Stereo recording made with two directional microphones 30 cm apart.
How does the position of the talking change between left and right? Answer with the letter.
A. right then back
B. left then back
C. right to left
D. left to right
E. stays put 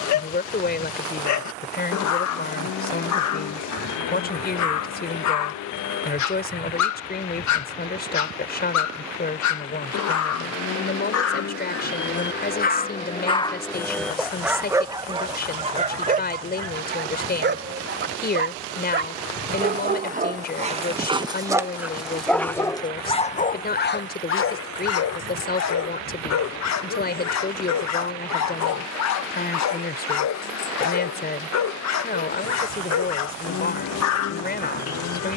E.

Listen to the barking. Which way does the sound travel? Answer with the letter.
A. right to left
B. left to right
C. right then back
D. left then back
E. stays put
C.